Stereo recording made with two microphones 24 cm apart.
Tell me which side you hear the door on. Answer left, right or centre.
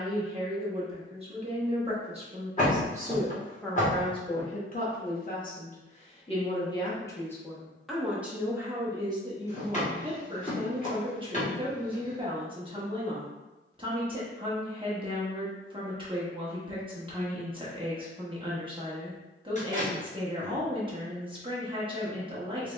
left.